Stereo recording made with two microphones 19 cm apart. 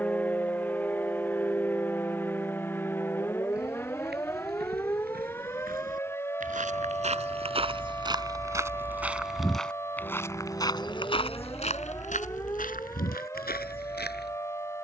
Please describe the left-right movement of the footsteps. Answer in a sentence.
You can hear the footsteps move to the left.